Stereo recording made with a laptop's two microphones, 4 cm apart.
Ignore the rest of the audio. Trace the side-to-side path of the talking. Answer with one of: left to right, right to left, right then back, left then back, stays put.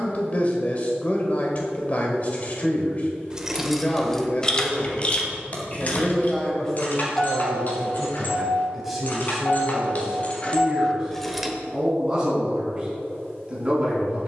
left to right.